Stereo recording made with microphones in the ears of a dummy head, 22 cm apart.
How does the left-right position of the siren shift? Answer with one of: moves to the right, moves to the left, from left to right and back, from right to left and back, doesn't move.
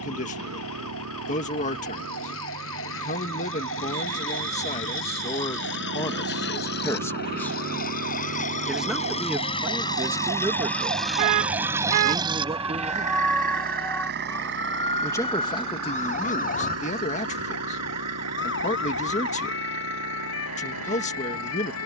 moves to the left.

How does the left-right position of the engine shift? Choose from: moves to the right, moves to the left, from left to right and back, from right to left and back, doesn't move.
moves to the right.